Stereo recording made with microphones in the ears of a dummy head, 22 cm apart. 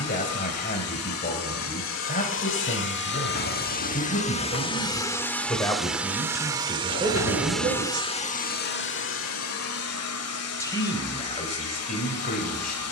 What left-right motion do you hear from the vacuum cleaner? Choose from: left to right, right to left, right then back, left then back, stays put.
right then back.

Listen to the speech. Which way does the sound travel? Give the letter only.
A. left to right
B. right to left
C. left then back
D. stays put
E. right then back
E.